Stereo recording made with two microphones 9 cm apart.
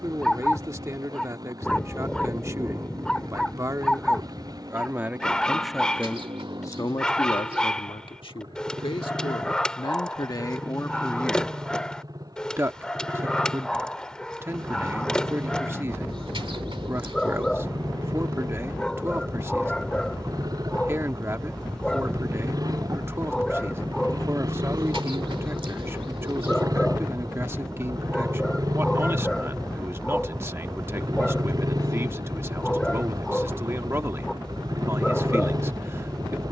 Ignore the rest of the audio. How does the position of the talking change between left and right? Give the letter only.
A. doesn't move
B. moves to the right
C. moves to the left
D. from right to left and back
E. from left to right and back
D.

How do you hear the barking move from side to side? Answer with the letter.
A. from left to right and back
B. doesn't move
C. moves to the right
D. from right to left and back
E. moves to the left
B.